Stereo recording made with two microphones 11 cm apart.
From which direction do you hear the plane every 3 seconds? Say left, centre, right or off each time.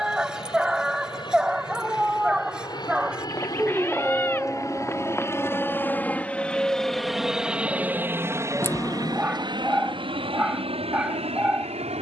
left, left, centre, right.